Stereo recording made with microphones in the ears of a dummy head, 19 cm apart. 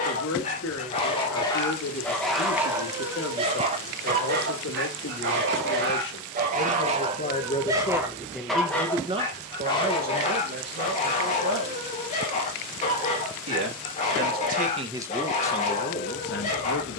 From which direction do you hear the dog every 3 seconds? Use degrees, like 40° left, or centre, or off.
10° left, 40° right, 20° right, 30° left, 30° left, 30° left.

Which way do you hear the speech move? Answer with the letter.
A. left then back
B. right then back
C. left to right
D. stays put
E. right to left
B.